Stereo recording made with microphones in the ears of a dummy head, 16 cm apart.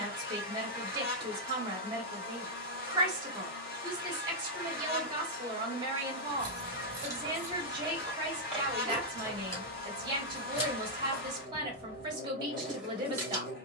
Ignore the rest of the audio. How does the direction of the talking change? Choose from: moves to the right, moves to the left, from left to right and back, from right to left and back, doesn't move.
doesn't move.